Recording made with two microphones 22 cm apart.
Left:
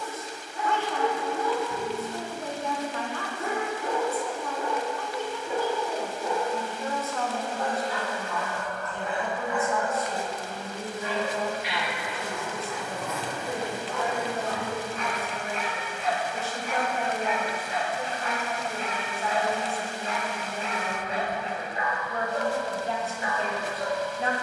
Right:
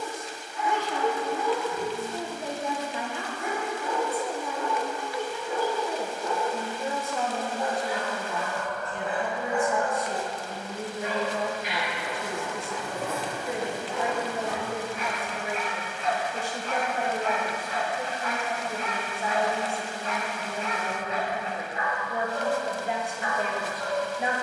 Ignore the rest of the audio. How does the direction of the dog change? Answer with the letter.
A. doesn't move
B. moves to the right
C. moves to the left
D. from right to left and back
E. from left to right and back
E.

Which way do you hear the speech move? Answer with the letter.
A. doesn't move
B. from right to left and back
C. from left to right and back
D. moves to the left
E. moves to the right
A.